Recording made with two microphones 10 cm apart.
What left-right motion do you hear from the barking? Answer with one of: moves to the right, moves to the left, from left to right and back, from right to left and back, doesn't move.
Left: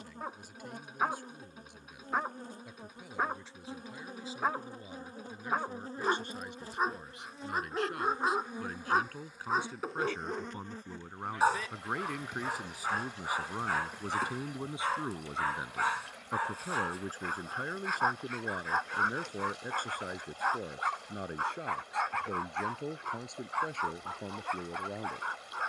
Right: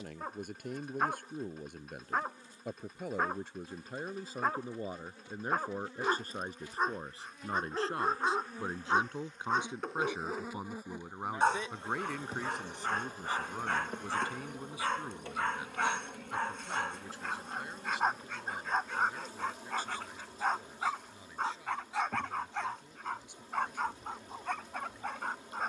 doesn't move.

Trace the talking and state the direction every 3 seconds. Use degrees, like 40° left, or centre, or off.
50° right, 50° right, 30° right, 10° right, 10° left, 40° left, 50° left, 60° left, 70° left.